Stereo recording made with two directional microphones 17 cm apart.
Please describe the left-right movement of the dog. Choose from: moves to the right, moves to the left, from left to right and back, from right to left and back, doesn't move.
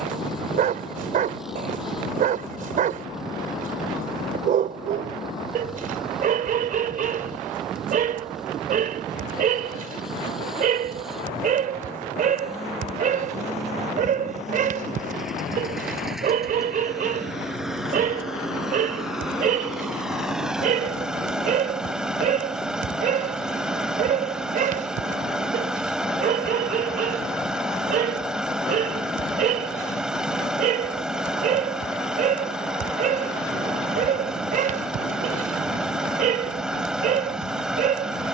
doesn't move.